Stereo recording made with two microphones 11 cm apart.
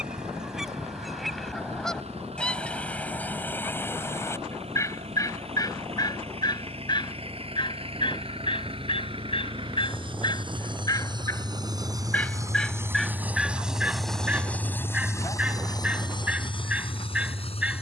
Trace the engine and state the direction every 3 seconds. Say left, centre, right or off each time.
right, right, right, right, centre, left.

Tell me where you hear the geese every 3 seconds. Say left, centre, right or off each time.
centre, left, left, left, centre, centre.